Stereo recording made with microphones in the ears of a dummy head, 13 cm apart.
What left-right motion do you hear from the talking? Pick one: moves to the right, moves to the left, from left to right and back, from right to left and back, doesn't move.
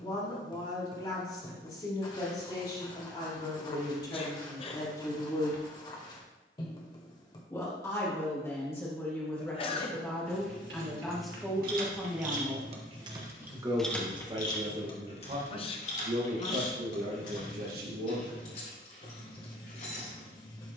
moves to the right.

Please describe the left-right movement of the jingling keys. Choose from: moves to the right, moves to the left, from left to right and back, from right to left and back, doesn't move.
moves to the left.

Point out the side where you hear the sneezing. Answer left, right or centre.
left.